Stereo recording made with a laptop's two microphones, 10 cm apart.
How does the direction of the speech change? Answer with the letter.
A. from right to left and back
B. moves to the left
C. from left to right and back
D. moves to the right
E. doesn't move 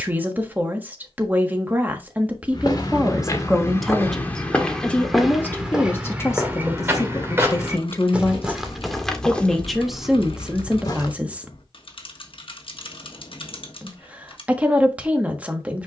A.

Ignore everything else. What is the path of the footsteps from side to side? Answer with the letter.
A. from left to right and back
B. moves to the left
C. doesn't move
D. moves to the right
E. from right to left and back
A.